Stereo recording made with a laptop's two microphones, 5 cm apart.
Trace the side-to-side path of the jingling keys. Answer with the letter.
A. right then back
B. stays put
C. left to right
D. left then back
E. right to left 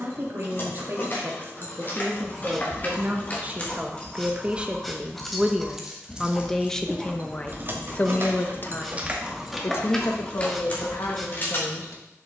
A.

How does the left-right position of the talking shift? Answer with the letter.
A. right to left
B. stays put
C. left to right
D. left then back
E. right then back
A.